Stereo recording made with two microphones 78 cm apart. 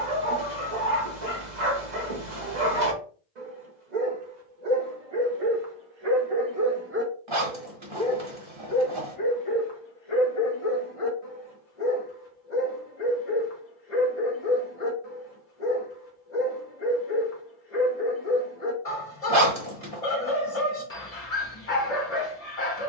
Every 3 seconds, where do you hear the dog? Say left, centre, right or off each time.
right, right, centre, left, left, left, left, left.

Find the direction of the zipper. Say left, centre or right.
right.